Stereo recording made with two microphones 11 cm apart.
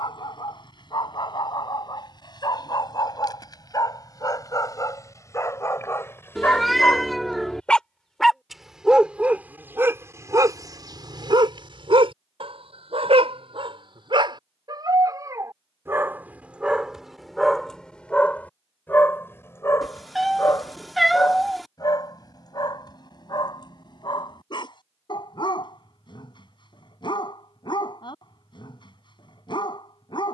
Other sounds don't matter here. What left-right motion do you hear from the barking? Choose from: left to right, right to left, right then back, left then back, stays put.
right then back.